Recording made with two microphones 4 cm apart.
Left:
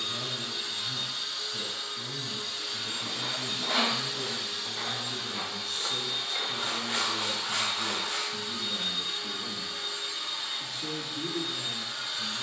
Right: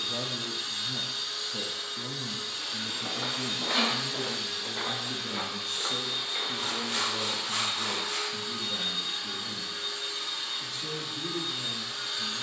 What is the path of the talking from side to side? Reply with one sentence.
You can hear the talking go from the right side to the left.